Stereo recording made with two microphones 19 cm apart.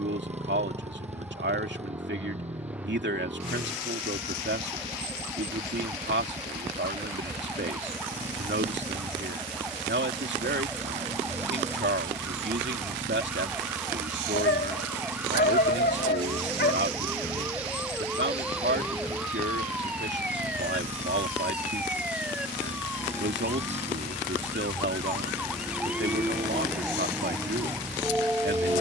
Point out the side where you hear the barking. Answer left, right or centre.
left.